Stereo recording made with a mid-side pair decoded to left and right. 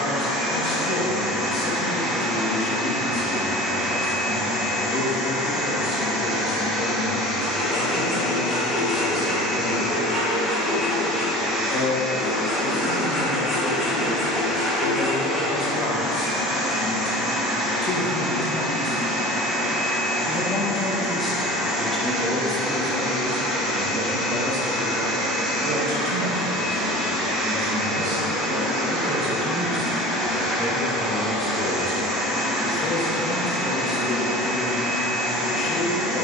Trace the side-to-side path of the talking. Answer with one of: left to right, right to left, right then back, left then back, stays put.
right then back.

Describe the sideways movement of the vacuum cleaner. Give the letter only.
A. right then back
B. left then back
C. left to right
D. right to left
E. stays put
E.